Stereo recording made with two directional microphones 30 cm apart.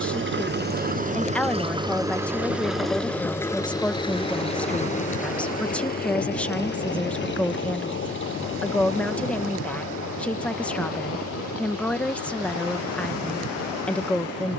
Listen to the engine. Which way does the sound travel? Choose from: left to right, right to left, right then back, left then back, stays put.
right to left.